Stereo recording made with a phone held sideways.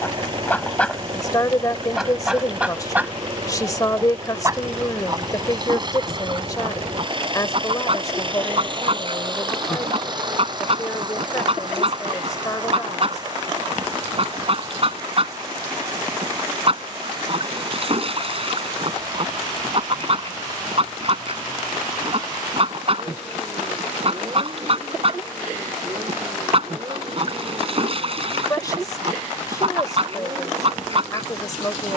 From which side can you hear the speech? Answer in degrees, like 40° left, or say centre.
20° left.